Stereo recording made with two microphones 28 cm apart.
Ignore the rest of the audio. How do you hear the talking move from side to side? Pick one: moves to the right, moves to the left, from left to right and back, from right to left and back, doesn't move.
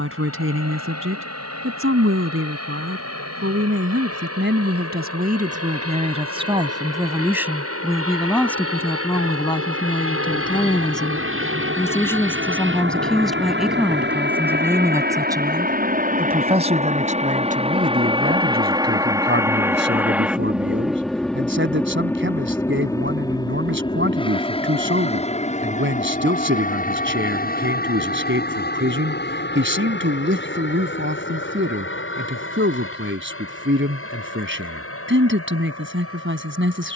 from right to left and back.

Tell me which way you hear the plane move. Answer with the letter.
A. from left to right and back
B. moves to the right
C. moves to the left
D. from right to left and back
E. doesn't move
C.